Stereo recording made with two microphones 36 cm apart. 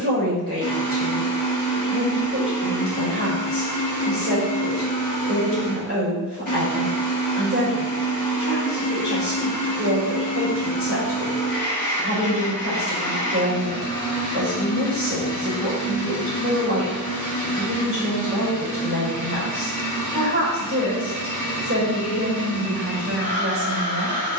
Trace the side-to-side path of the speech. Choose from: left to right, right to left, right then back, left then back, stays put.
stays put.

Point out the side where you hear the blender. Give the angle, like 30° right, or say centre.
50° right.